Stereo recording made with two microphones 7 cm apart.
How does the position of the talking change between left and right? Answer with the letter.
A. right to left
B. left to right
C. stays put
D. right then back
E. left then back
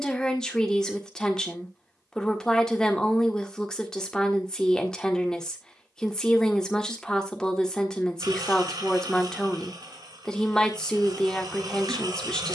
C.